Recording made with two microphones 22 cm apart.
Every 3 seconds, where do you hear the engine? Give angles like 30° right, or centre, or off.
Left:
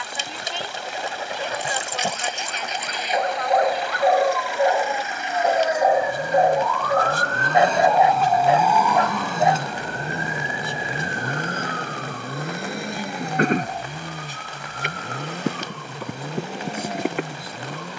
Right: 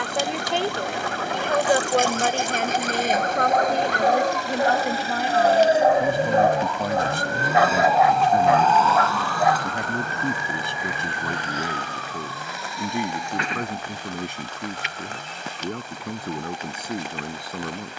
50° right, 40° right, 10° right, 40° left, 60° left, 80° left.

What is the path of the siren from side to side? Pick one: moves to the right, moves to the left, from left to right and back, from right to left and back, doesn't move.
moves to the left.